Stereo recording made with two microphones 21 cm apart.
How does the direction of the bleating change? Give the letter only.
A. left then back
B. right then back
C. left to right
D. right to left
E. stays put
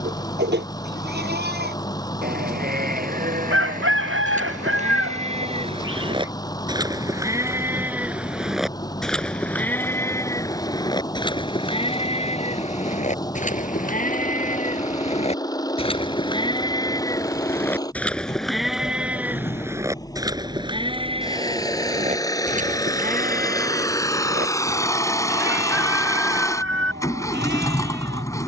A.